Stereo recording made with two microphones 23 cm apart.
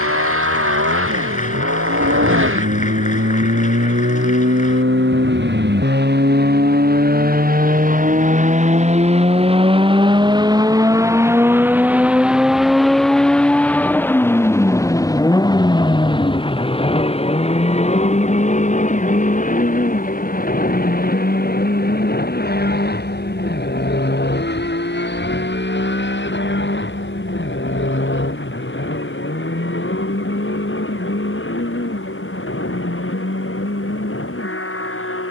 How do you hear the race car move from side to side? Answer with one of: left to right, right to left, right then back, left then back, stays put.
right to left.